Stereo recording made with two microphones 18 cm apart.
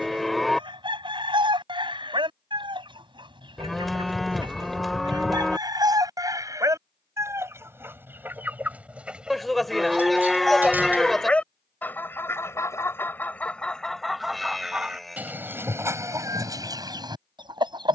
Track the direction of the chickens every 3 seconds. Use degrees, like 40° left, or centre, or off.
30° right, 20° right, 10° right, centre, 10° left, 20° right.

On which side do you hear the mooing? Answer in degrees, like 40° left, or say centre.
centre.